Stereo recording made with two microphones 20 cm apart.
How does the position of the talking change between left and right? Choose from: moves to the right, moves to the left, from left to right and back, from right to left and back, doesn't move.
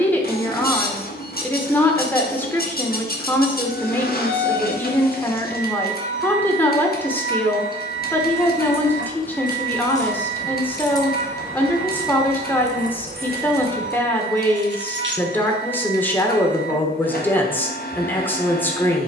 doesn't move.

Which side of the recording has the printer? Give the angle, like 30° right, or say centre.
50° left.